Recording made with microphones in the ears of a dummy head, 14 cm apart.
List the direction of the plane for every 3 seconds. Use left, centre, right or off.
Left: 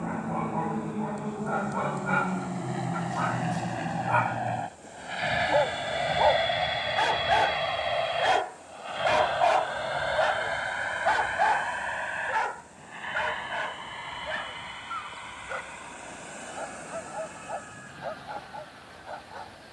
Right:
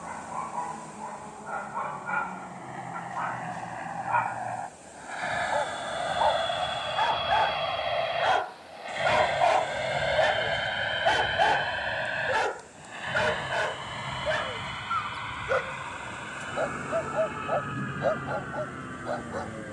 left, left, centre, right, right, right, right.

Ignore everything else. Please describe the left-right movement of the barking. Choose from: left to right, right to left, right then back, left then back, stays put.
left to right.